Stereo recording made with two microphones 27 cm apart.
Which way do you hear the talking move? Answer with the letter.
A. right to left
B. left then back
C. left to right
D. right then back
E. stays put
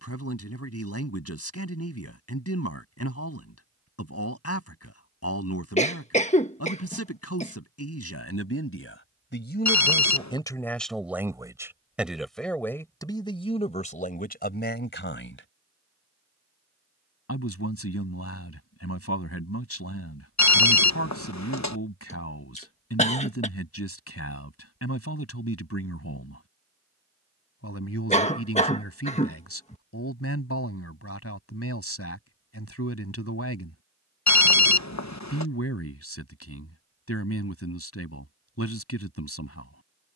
D.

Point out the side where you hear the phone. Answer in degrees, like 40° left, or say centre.
80° left.